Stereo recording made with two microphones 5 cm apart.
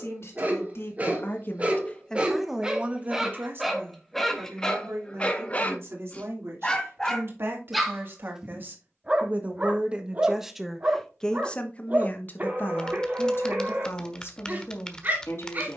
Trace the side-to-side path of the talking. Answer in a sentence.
In this clip you hear the talking go right and come back.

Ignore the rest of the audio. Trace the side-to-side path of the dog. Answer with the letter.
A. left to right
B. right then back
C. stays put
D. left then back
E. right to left
D.